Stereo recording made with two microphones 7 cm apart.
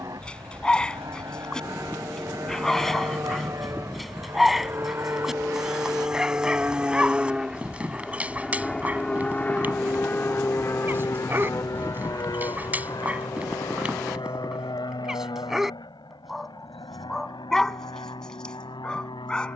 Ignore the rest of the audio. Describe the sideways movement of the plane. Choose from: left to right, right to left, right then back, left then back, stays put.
right to left.